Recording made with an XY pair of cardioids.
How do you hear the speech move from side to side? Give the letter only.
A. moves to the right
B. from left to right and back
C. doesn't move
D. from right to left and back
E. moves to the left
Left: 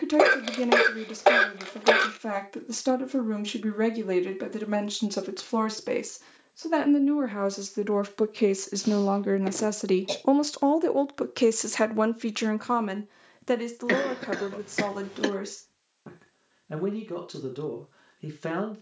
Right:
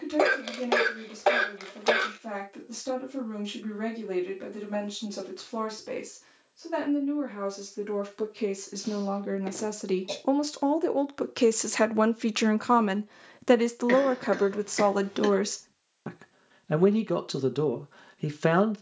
A.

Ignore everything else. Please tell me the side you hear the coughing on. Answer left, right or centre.
left.